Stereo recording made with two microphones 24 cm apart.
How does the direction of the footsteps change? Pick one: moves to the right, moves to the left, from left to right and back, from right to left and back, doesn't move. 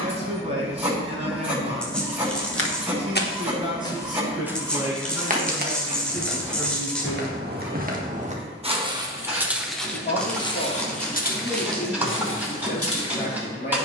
from left to right and back.